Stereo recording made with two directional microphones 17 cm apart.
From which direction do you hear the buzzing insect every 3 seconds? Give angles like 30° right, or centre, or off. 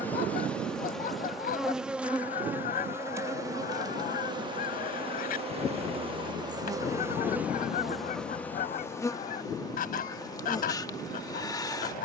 centre, 30° right, 10° right, 20° left.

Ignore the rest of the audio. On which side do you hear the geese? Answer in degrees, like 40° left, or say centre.
60° left.